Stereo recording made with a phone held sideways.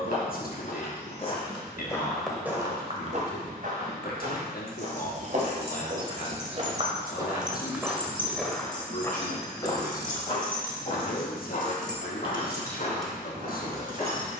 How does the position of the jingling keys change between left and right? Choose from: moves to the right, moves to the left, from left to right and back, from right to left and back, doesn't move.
from right to left and back.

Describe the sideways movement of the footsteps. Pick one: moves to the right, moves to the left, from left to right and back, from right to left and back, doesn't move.
from left to right and back.